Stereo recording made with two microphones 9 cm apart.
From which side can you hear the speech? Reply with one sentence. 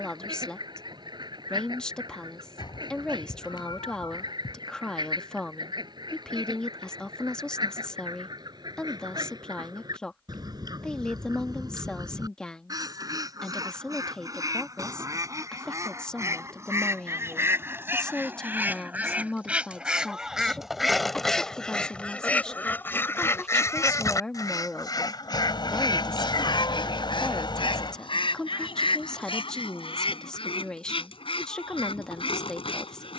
In this clip you hear the speech in the centre.